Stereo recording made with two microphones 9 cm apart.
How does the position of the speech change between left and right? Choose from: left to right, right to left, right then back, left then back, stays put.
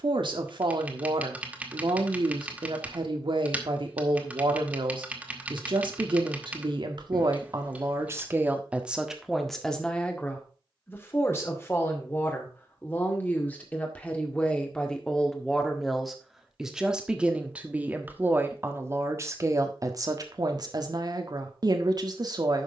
left then back.